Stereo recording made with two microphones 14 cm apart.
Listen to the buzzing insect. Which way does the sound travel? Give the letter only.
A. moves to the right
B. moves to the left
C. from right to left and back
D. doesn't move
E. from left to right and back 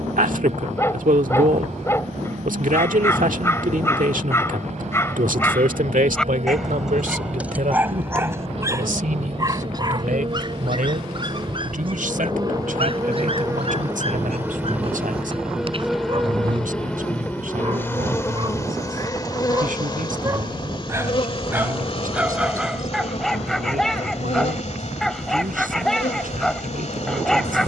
B.